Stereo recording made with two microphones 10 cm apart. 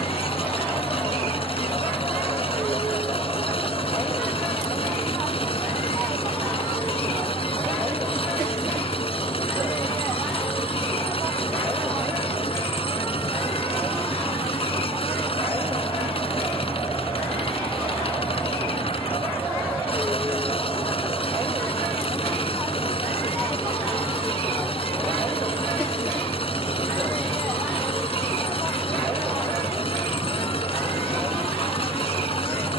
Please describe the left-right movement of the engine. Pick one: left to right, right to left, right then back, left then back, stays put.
stays put.